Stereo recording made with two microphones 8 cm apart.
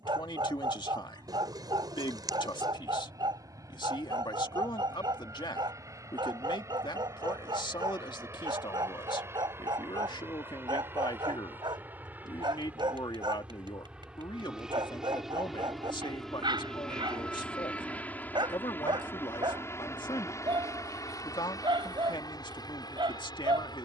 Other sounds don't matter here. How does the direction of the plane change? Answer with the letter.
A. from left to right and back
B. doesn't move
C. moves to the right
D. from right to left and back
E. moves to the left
E.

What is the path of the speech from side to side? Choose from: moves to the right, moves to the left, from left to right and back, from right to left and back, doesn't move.
doesn't move.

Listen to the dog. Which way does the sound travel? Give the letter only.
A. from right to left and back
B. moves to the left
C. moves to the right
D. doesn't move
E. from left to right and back
D.